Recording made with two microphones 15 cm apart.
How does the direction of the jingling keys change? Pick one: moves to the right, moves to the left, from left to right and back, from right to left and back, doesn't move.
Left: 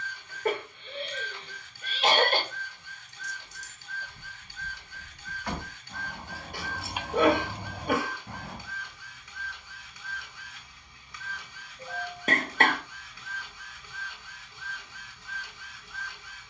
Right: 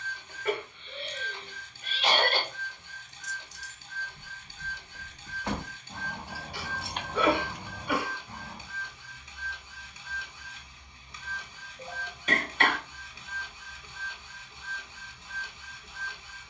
from left to right and back.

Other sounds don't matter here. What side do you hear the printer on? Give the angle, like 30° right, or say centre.
20° right.